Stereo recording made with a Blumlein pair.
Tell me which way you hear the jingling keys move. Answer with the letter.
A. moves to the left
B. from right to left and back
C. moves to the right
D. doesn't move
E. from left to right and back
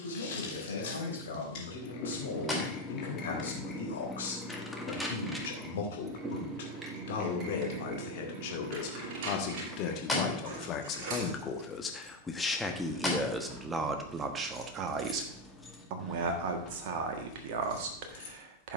E.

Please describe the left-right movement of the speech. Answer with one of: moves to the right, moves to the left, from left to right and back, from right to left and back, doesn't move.
moves to the right.